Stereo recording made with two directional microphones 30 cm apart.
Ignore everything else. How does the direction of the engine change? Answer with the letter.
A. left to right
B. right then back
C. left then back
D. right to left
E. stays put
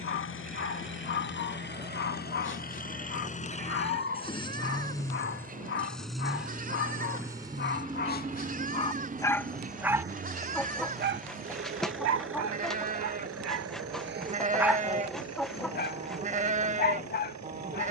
A.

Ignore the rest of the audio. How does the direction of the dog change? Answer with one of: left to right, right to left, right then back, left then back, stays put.
right then back.